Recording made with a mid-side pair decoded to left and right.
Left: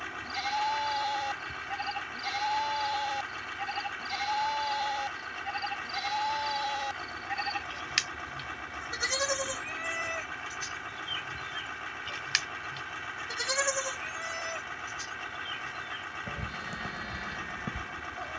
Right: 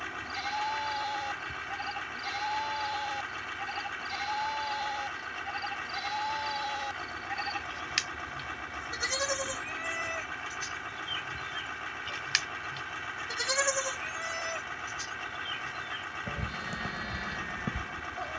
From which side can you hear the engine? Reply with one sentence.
You can hear the engine in the centre.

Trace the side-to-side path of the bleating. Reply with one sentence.
You can hear the bleating move from left to right.